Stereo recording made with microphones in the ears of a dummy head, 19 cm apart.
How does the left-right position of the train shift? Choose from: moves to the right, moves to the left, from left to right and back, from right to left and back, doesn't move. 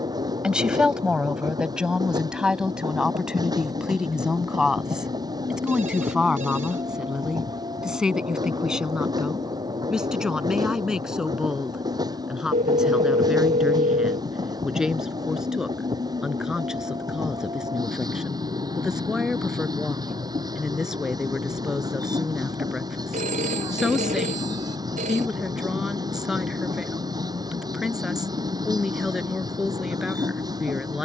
doesn't move.